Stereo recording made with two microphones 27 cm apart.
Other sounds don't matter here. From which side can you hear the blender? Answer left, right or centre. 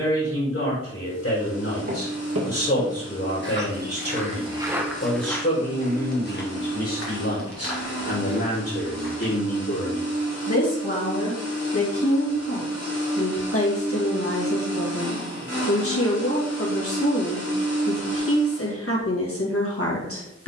right.